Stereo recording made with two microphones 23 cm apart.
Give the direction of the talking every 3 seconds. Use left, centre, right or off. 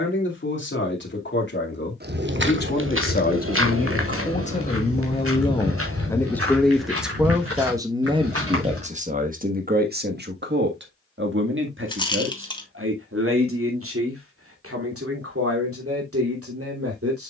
left, left, centre, right, right, right.